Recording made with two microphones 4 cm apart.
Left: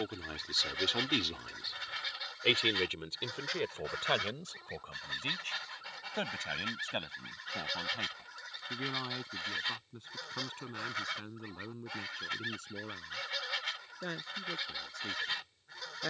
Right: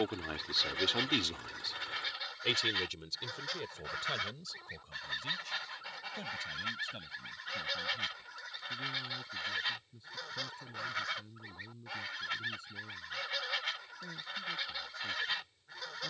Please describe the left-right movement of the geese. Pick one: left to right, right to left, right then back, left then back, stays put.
stays put.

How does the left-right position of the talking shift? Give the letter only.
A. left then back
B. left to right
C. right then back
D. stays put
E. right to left
E.